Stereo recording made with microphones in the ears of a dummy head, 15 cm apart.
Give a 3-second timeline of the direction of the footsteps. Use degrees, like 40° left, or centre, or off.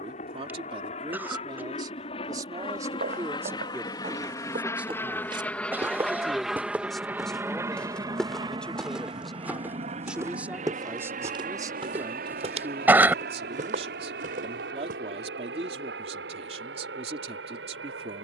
60° right, 40° right, centre, 20° right, 50° right, off.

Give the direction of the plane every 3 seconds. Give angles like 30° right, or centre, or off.
40° left, 20° left, 10° right, 40° right, 60° right, 70° right.